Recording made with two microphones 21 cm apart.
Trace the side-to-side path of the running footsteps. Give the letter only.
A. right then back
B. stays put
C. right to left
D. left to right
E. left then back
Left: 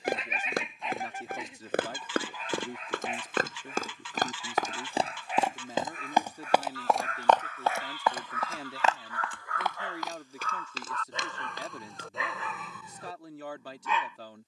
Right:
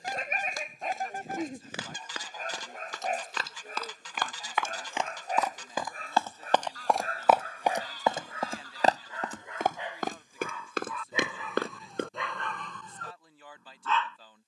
D.